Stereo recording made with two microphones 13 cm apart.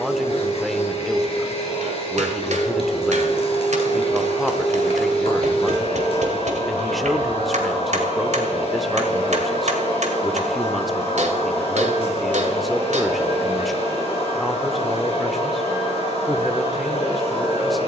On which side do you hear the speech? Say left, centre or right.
centre.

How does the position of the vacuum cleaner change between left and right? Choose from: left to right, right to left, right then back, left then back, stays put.
stays put.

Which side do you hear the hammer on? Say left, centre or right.
right.